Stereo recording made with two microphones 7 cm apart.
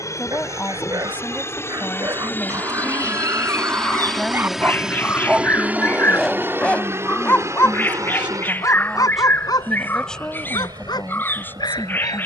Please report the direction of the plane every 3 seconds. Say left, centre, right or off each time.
left, centre, right, right.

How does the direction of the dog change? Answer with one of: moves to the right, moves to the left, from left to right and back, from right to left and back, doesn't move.
moves to the left.